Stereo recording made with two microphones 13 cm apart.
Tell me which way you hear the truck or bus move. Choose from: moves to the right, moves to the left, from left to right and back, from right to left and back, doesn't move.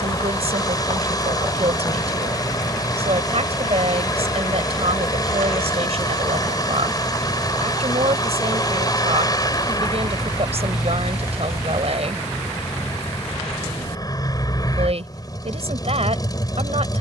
doesn't move.